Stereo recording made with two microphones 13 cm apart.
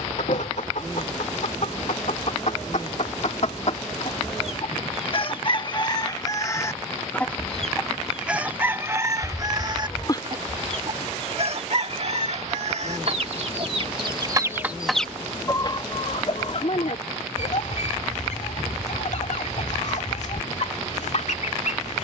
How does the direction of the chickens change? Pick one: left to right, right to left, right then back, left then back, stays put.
right then back.